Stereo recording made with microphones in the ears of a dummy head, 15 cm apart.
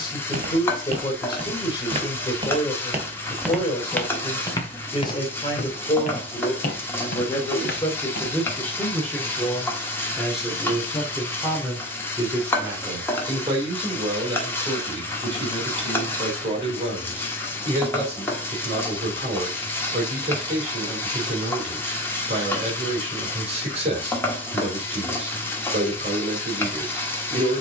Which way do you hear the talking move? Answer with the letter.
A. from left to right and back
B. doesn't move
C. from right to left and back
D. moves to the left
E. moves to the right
E.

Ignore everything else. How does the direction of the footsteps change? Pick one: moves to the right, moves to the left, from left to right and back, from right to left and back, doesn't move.
moves to the left.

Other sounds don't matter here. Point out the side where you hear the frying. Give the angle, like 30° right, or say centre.
10° left.